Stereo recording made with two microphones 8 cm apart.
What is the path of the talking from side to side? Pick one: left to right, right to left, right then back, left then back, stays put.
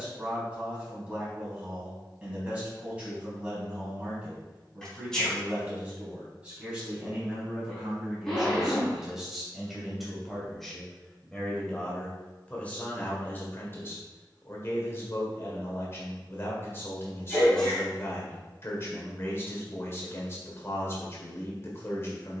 right to left.